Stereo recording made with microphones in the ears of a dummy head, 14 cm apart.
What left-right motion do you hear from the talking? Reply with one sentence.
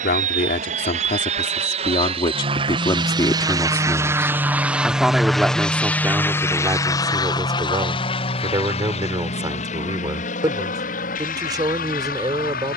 In this clip you hear the talking go from the left side to the right.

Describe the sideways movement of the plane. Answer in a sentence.
In this clip you hear the plane move to the left.